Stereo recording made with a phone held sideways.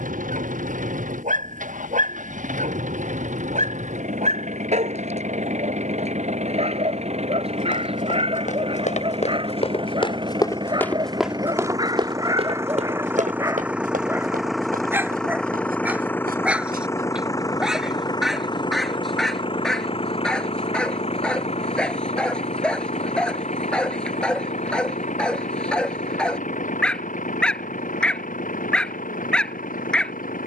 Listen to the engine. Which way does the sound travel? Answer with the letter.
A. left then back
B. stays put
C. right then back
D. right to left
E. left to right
D.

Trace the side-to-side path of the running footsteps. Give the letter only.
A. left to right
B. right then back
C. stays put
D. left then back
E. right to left
A.